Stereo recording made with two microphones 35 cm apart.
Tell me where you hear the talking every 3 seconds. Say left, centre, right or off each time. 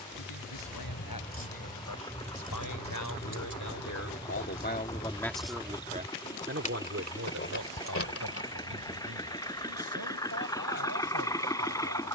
left, left, right, right.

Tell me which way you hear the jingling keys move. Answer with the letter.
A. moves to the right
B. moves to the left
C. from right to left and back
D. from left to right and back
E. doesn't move
D.